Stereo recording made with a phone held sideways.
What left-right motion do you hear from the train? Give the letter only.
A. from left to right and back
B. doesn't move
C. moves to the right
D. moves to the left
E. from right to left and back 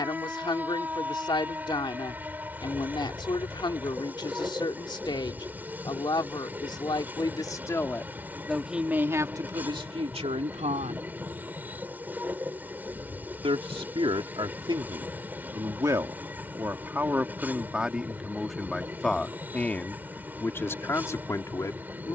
B.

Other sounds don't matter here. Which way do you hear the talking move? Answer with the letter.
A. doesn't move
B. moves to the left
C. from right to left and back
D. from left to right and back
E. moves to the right
D.